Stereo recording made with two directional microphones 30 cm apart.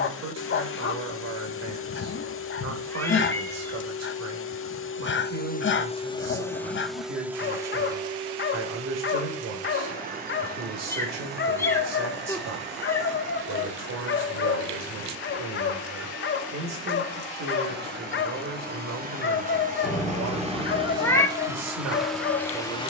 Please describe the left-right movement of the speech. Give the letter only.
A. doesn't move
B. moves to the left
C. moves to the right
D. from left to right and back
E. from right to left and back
A.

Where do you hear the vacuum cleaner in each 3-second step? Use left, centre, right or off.
left, left, centre, right, right, right, right, centre.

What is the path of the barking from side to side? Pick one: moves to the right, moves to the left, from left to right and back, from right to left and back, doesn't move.
doesn't move.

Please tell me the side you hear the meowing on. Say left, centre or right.
centre.